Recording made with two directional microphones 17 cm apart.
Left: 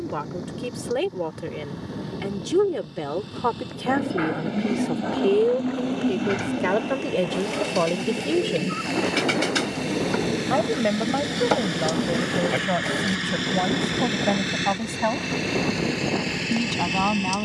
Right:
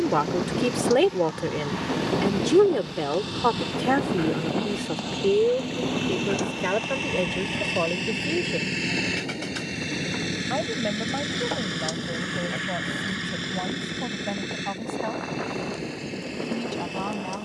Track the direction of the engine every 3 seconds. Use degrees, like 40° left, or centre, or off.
60° right, 50° right, 40° right, 20° right, 20° left, 50° left.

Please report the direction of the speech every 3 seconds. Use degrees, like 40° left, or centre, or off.
30° right, centre, 20° left, 40° left, 40° left, 50° left.